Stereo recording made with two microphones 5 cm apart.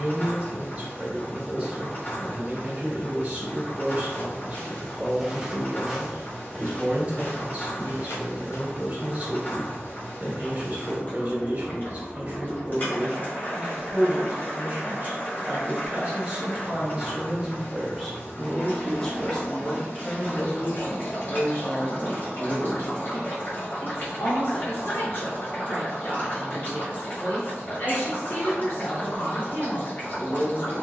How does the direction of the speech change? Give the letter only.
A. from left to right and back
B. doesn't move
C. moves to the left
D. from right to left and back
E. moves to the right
C.